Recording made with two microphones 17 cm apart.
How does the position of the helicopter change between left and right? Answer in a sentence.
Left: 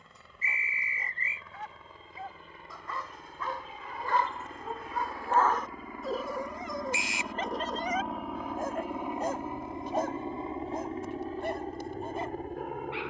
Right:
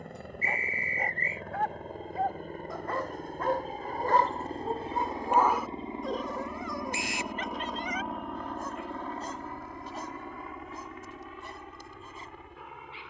You can hear the helicopter travel towards the left.